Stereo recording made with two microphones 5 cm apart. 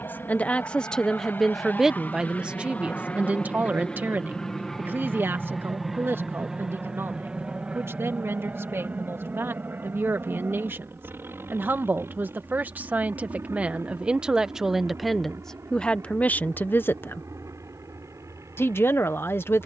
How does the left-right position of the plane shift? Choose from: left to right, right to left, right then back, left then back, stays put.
left to right.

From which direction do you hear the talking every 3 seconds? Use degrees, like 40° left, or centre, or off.
centre, 40° right, 50° right, 50° right, 20° right, 30° left, 50° left.